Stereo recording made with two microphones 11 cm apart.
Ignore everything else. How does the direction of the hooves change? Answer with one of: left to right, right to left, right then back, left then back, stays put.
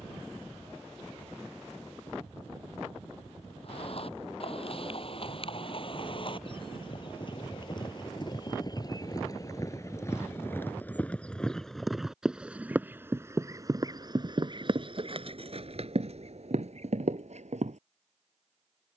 left to right.